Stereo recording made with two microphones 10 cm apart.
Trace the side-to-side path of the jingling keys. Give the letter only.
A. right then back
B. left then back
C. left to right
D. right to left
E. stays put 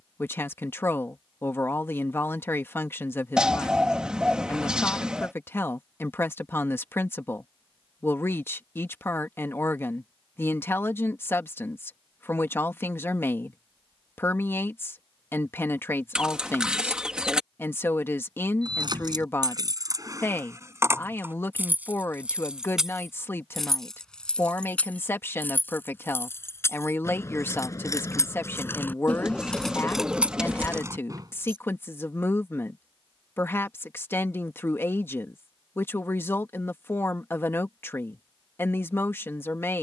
B.